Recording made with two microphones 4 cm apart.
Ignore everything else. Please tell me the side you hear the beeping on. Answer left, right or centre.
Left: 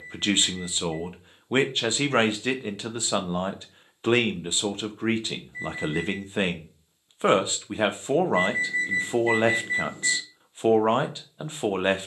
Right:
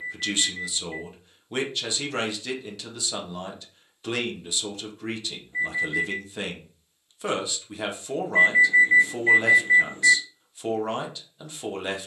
right.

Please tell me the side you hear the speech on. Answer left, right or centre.
left.